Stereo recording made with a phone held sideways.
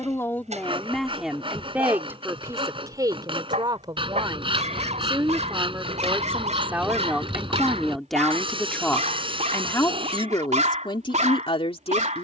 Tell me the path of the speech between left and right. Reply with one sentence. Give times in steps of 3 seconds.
In this clip you hear the speech in the centre from 0 s, on the right from 3 s, in the centre from 6 s and on the left from 9 s.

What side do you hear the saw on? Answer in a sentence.
You can hear the saw on the right.